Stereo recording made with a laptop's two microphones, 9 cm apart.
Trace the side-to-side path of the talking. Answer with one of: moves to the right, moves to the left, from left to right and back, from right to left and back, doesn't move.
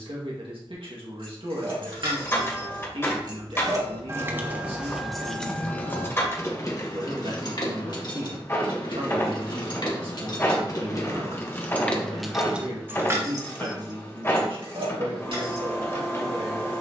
doesn't move.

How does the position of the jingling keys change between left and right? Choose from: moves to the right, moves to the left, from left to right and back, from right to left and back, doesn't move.
from right to left and back.